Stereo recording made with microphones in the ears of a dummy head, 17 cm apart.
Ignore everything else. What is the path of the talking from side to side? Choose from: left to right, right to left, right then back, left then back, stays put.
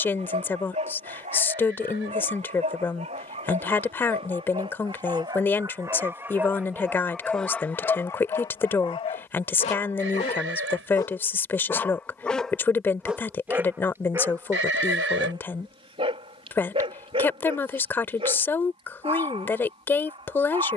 stays put.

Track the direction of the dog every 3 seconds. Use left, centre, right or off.
right, right, centre, left, centre, right, right.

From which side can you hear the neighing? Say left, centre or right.
right.